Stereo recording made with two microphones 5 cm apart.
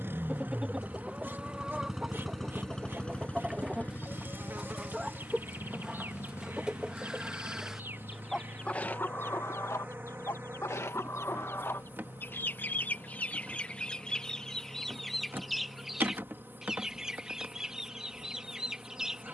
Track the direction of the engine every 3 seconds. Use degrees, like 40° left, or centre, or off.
10° right, 40° left, 60° left, 70° left, 70° left, 80° left, 80° left.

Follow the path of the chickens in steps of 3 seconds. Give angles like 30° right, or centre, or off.
20° right, 20° right, 10° right, 60° left, 20° left, 10° right, 10° right.